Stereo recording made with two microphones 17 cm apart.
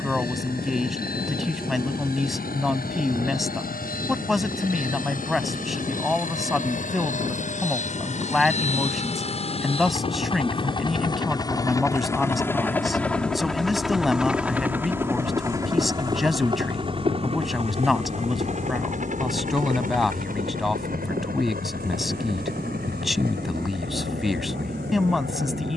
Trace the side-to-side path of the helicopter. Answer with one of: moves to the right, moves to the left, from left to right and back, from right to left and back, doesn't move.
moves to the right.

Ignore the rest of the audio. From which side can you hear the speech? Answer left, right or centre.
centre.